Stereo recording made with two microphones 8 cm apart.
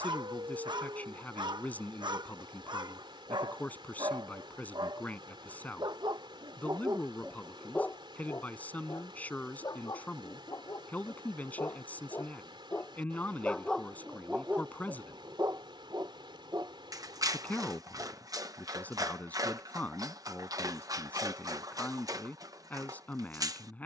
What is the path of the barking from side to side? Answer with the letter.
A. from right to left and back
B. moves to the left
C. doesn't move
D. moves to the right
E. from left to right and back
A.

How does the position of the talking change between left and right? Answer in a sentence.
In this clip you hear the talking stay in one place.